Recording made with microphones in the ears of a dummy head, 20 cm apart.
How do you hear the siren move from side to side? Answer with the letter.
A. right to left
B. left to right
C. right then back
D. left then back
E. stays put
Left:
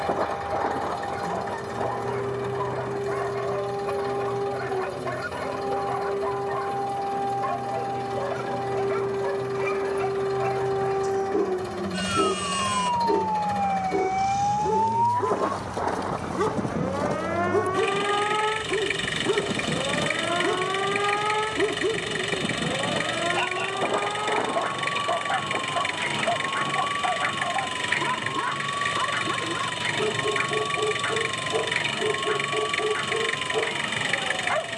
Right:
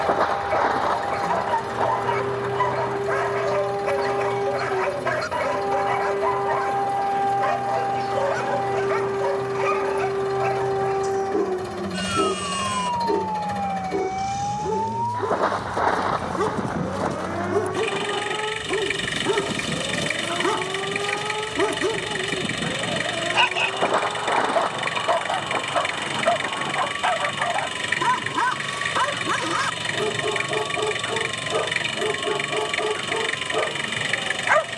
A.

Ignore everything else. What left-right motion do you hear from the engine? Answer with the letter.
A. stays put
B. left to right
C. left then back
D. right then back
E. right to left
A.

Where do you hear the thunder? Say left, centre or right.
right.